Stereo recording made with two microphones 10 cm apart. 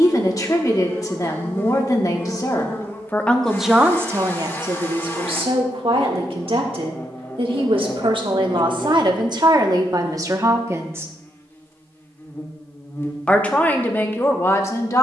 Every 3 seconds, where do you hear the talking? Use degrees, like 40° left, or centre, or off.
30° left, 30° right, 60° right, 40° right, 20° left.